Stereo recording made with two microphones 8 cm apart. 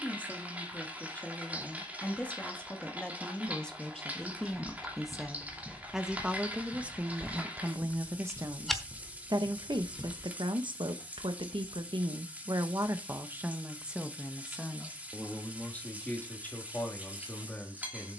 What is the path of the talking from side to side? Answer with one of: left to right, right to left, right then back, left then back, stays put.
right then back.